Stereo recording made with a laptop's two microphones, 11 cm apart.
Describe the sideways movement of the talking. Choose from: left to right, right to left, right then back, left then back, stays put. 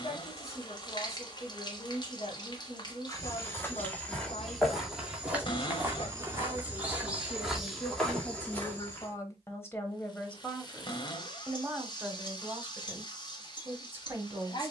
left to right.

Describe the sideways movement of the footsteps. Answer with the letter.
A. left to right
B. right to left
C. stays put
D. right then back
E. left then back
D.